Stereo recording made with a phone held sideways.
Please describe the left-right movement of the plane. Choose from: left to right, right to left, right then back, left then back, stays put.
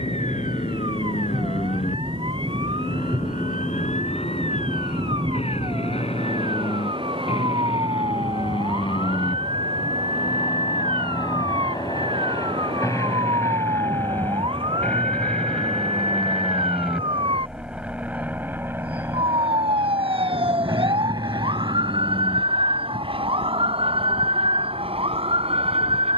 left to right.